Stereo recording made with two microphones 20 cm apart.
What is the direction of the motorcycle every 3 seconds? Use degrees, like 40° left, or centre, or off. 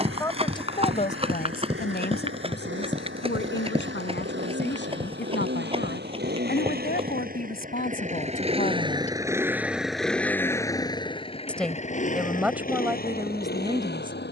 80° right, 70° right, 40° right, 10° left, 50° left.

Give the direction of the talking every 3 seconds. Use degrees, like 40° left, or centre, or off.
40° left, 70° left, 50° left, 20° left, 10° right.